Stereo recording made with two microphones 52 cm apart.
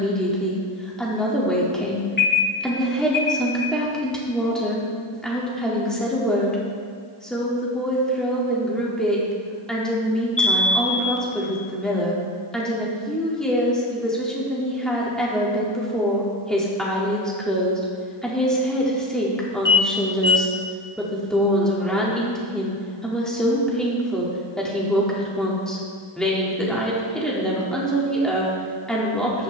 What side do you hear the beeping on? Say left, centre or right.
left.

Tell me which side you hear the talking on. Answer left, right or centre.
centre.